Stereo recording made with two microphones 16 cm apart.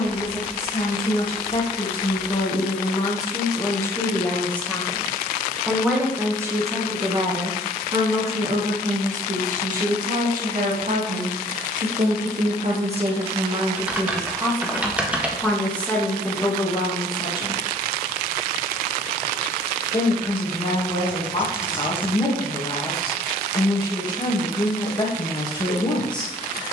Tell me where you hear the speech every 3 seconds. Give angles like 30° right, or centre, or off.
30° left, 10° left, 30° right, 50° right, 30° right, 20° left, 30° left, 30° left, 30° left.